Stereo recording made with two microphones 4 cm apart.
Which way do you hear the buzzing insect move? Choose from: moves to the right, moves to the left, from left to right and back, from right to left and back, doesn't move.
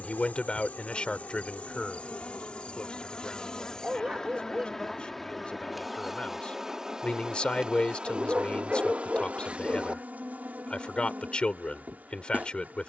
moves to the right.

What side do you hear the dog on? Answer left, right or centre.
right.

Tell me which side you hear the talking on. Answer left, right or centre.
left.